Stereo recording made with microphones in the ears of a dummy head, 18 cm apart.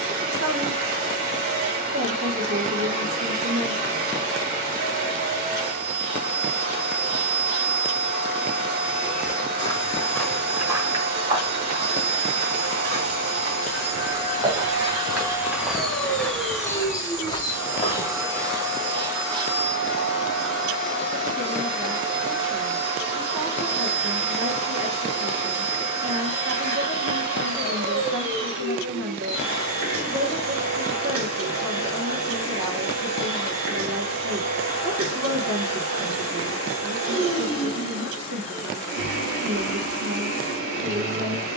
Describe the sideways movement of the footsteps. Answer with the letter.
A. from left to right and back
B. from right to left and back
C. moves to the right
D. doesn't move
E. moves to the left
A.